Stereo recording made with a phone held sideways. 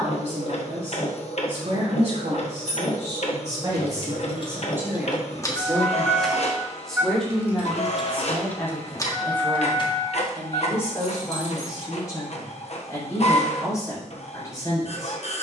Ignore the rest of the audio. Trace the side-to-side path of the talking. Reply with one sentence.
You can hear the talking go from the right side to the left.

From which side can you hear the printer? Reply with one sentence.
You can hear the printer on the left.